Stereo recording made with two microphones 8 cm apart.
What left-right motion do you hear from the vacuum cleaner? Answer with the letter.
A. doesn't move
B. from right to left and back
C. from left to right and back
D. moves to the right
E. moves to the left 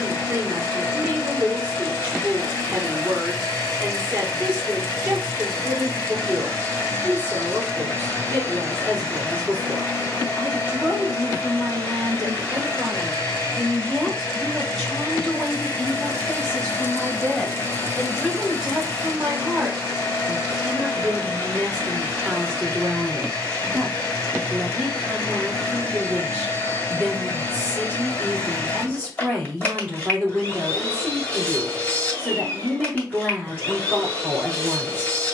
A.